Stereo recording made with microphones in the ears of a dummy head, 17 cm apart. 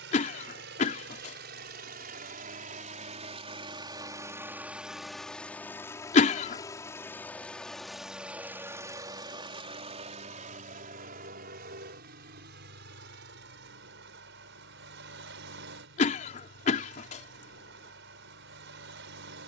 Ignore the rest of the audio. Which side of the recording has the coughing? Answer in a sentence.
You can hear the coughing on the left.